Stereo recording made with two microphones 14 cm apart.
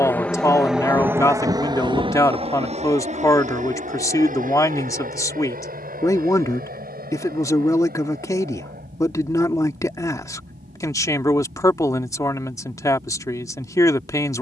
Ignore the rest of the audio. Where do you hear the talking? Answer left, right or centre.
left.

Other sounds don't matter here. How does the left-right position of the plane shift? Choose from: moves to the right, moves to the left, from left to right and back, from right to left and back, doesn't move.
moves to the right.